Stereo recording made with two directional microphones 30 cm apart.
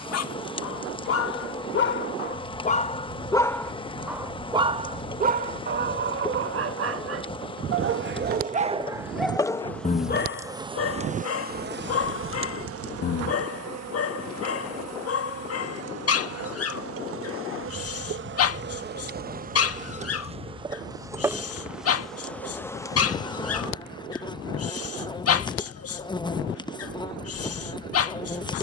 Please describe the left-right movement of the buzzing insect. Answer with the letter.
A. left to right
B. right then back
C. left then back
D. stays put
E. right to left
B.